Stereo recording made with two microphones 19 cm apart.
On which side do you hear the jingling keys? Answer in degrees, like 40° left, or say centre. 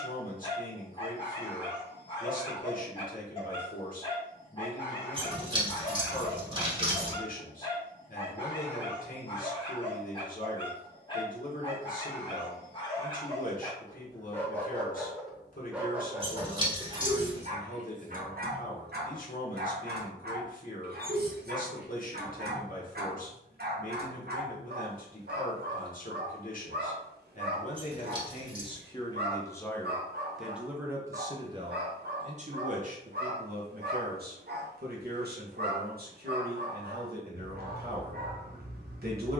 30° right.